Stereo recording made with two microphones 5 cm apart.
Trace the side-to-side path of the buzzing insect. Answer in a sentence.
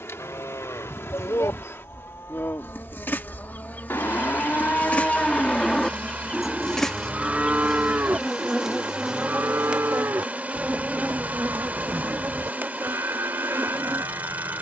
In this clip you hear the buzzing insect travel towards the right.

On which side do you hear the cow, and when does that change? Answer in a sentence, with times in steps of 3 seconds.
In this clip you hear the cow on the left from 0 s and on the right from 6 s.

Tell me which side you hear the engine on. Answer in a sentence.
In this clip you hear the engine on the right.